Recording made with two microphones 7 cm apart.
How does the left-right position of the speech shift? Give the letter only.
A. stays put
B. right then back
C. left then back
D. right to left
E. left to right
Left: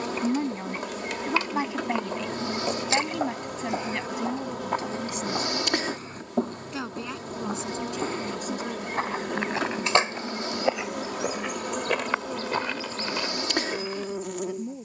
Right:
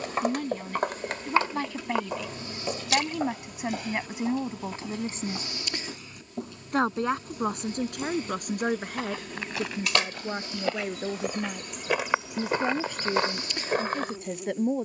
E.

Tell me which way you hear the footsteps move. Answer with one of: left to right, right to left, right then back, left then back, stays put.
left then back.